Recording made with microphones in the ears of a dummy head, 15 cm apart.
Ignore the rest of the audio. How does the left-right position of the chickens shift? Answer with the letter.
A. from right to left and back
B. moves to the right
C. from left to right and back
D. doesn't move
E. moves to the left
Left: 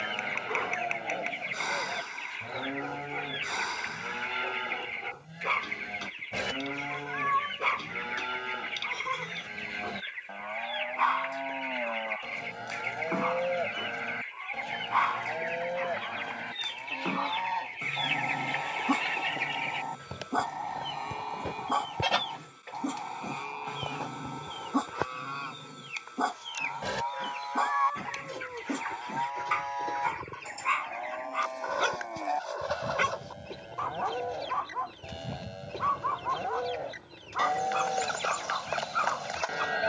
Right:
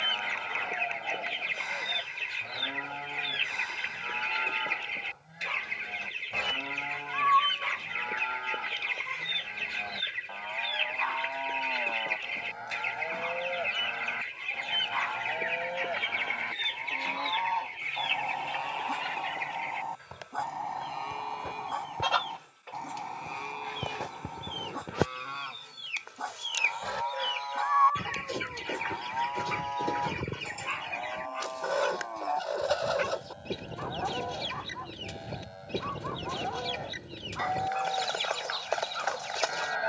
A.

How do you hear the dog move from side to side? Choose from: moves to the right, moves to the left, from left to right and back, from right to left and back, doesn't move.
doesn't move.